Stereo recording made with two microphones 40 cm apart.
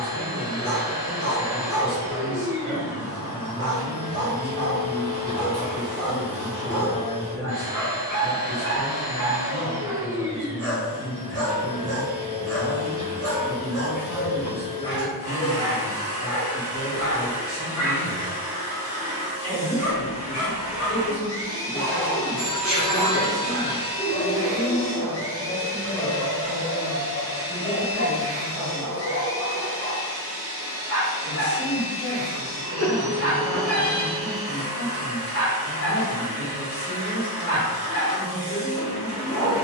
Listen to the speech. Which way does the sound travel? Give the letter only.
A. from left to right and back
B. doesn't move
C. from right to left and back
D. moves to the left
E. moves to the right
B.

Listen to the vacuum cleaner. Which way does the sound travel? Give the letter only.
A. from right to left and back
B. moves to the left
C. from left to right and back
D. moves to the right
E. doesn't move
E.